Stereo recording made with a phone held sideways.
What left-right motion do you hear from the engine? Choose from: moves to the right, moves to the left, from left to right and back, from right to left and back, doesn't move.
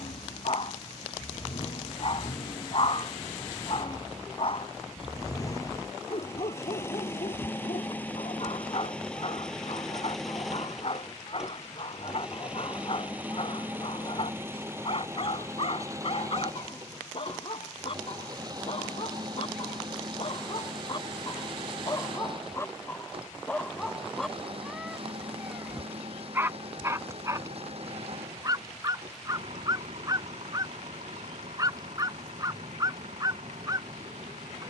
moves to the right.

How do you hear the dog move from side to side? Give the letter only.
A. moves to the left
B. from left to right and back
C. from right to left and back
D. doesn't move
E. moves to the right
E.